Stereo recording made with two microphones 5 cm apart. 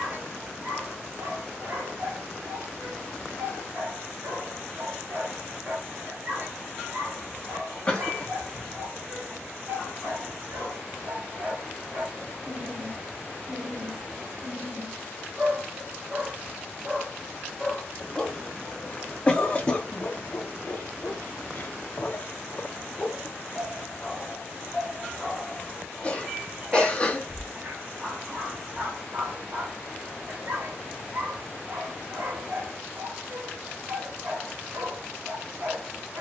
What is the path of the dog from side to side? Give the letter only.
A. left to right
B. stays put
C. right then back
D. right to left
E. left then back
E.